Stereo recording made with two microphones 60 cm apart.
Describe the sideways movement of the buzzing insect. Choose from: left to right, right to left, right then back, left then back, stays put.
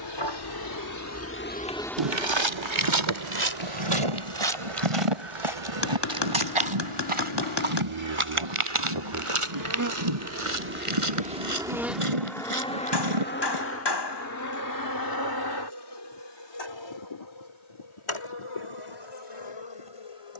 right then back.